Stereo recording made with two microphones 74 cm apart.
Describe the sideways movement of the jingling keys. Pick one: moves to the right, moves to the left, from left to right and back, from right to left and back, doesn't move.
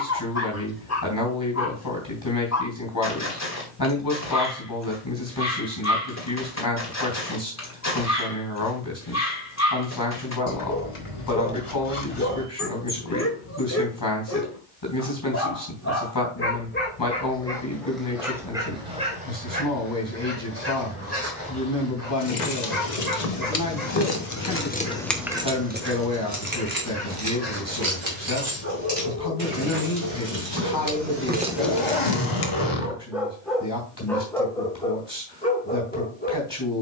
from left to right and back.